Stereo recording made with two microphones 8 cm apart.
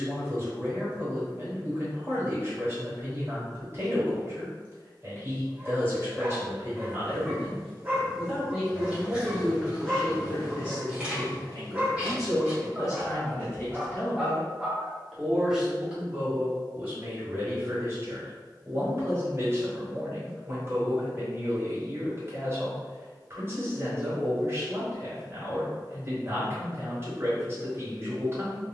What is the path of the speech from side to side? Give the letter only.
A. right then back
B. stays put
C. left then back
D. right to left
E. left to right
C.